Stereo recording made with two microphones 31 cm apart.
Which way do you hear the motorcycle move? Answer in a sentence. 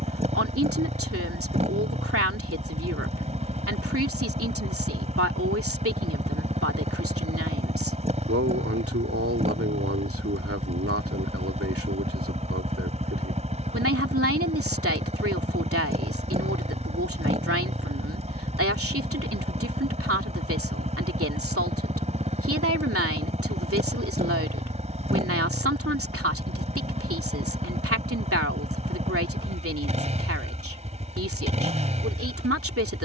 In this clip you hear the motorcycle stay in one place.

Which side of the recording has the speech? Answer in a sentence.
You can hear the speech on the right.